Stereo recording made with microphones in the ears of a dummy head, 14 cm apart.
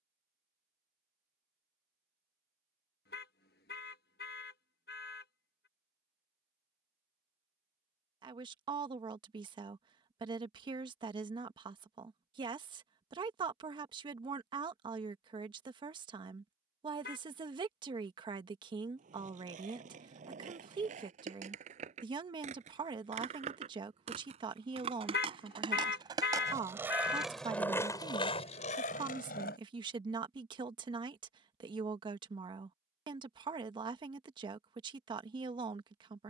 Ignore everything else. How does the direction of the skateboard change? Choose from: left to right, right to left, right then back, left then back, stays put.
right to left.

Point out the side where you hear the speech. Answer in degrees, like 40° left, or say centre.
30° right.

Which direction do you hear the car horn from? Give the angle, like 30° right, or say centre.
80° left.